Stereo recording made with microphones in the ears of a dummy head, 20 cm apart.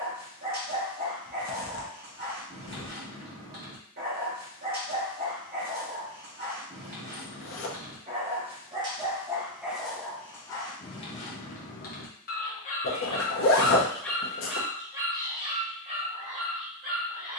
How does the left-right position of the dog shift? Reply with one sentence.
In this clip you hear the dog go left and come back.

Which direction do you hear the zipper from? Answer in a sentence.
In this clip you hear the zipper on the left.